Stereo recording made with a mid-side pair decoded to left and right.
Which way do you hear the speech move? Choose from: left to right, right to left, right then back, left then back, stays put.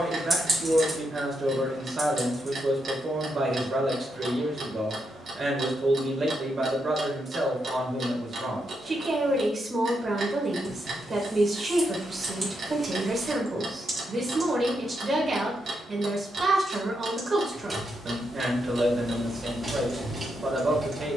stays put.